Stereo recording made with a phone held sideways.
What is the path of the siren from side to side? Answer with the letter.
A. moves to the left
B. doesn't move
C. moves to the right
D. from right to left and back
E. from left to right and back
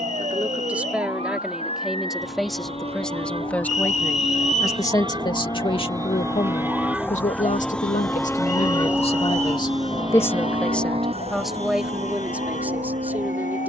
A.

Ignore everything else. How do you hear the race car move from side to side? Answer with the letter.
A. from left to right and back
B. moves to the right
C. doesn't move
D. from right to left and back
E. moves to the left
B.